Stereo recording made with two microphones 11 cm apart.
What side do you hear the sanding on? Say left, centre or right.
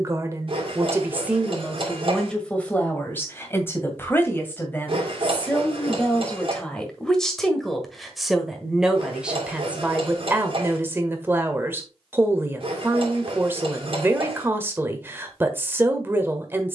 right.